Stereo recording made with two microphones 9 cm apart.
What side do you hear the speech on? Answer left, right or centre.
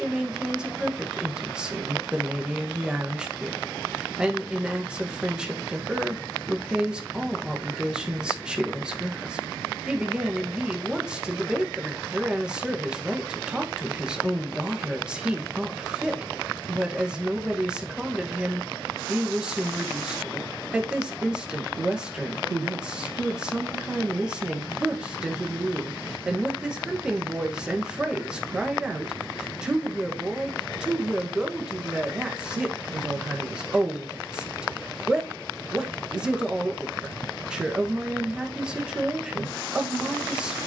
centre.